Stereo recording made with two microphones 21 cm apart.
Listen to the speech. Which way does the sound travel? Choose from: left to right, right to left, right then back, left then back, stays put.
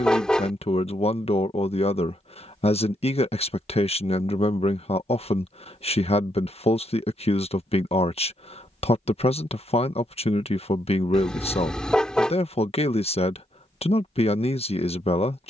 stays put.